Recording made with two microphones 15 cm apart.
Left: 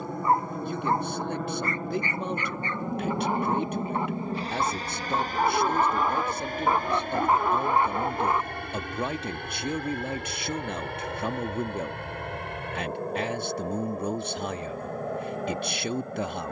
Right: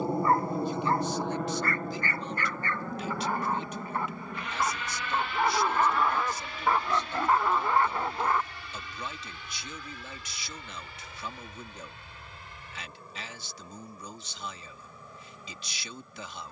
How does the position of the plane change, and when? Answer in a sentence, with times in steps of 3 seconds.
You can hear the plane in the centre from 0 s and on the left from 3 s.